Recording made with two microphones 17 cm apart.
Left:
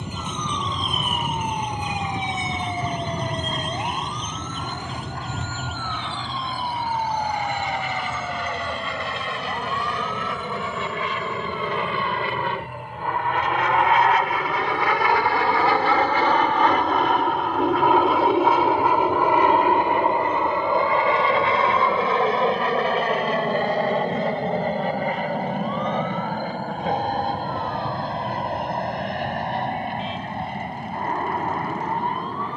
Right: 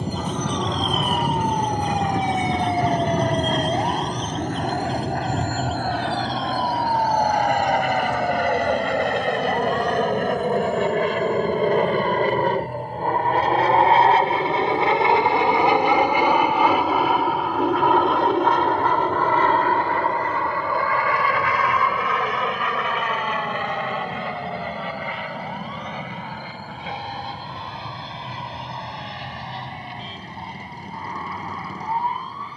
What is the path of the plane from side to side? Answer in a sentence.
You can hear the plane travel towards the left.